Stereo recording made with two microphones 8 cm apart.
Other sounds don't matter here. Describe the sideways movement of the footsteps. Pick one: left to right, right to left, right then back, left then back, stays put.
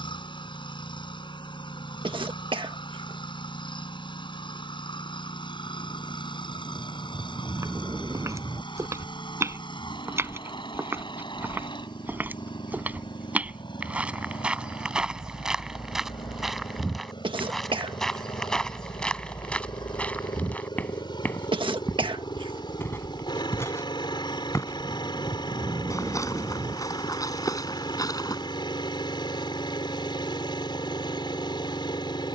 right to left.